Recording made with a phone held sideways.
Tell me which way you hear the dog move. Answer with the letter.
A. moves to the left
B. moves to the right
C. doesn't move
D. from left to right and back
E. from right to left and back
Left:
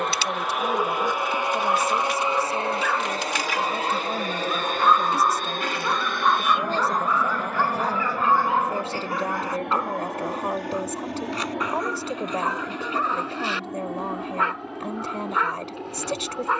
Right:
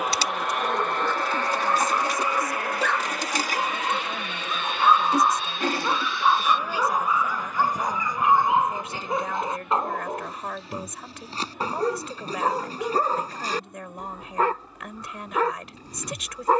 B.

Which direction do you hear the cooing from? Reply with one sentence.
You can hear the cooing on the right.